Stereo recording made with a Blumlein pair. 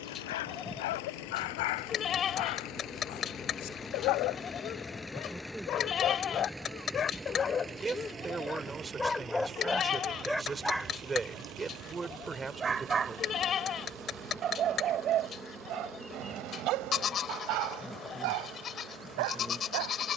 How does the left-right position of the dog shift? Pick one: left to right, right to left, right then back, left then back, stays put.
left to right.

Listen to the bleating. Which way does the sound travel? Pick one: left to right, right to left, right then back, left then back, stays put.
stays put.